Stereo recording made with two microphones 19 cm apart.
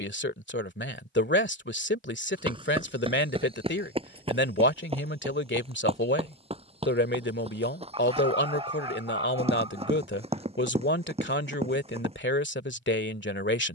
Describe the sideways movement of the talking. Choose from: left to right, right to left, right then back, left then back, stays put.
stays put.